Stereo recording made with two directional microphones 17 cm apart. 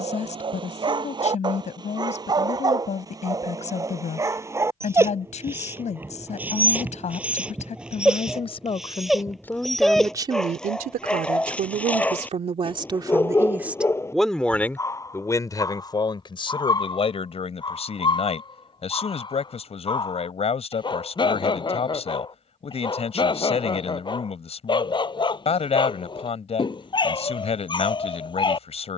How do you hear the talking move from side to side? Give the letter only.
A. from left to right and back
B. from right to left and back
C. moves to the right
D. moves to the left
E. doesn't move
A.